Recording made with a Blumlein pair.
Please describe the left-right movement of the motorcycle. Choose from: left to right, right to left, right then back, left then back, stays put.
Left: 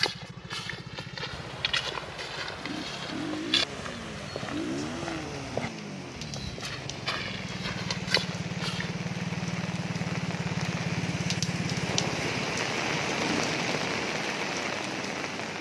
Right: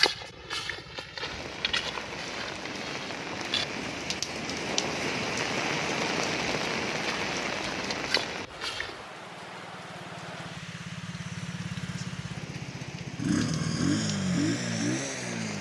left to right.